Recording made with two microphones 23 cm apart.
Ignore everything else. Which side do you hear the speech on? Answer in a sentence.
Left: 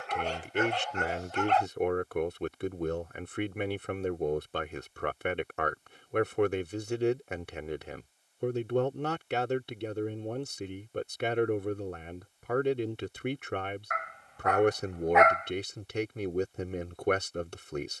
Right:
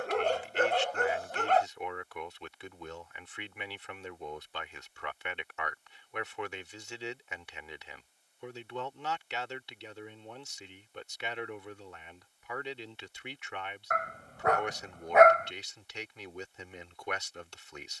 In this clip you hear the speech on the left.